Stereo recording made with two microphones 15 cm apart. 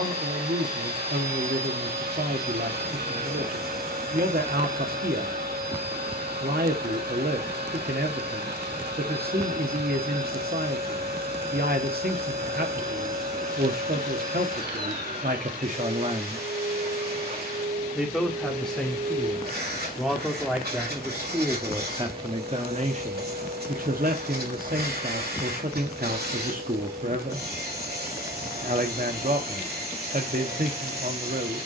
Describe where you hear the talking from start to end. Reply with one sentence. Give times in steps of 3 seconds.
You can hear the talking on the right from 0 s, in the centre from 18 s and on the right from 21 s.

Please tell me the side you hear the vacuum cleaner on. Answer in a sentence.
In this clip you hear the vacuum cleaner on the right.